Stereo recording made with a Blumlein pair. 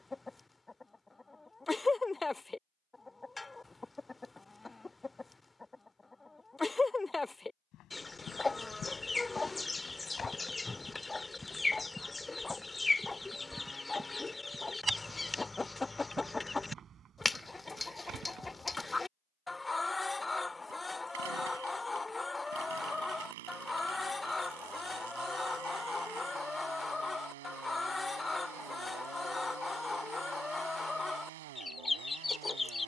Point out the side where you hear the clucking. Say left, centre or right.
centre.